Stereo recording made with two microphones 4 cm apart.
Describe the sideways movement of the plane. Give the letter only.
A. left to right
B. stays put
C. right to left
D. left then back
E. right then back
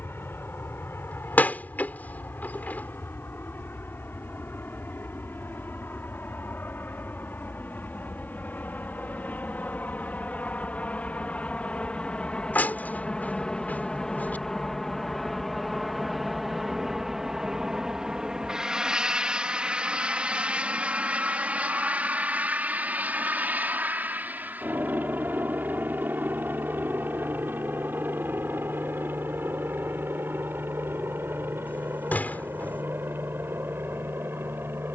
A.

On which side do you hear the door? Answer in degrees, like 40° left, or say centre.
40° left.